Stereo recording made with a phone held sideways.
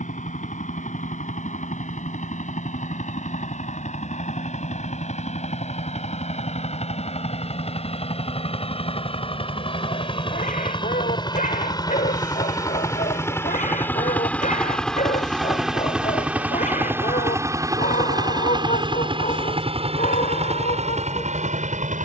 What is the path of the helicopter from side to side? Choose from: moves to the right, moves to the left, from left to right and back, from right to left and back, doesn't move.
moves to the right.